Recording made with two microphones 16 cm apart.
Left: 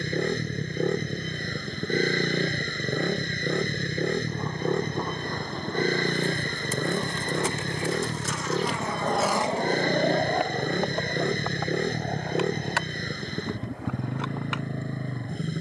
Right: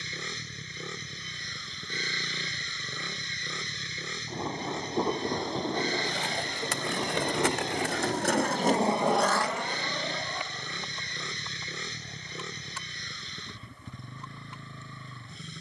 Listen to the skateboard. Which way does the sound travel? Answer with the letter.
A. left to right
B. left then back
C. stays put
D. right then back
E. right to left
E.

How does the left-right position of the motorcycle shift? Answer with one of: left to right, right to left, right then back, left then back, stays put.
stays put.